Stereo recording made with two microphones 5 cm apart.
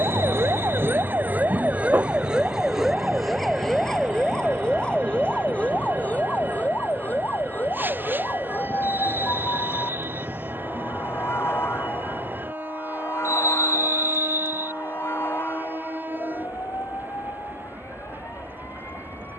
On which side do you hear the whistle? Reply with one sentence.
In this clip you hear the whistle on the right.